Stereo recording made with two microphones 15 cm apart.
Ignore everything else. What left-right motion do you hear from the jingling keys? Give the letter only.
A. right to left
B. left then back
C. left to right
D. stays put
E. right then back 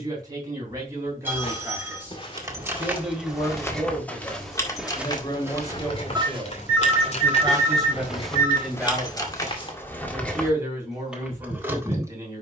B.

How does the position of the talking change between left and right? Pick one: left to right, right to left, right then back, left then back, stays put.
left then back.